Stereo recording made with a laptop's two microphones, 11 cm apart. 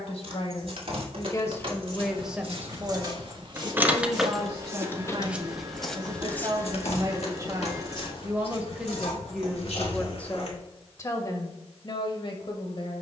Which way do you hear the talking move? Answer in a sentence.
In this clip you hear the talking go right and come back.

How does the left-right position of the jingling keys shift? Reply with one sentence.
In this clip you hear the jingling keys move from right to left.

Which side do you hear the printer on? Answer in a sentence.
In this clip you hear the printer on the right.